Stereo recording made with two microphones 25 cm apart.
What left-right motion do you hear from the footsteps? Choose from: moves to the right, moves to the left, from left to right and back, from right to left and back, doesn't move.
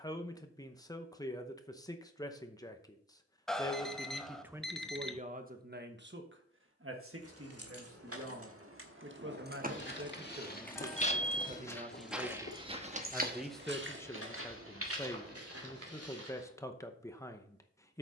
moves to the right.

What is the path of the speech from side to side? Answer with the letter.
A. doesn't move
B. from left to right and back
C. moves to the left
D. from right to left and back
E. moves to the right
B.